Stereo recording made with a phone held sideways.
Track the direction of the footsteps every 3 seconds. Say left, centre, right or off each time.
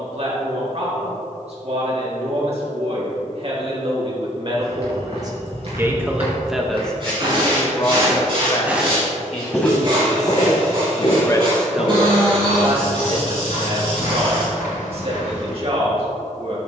off, right, right, left, left, left.